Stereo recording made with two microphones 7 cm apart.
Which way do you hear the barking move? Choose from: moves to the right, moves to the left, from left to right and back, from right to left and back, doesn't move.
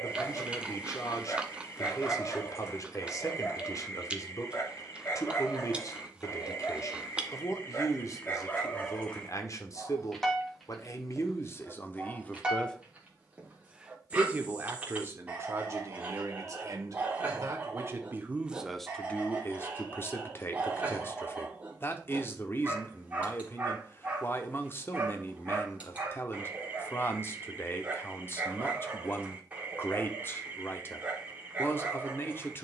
moves to the right.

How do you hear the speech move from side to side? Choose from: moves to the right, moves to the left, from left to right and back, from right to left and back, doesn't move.
from left to right and back.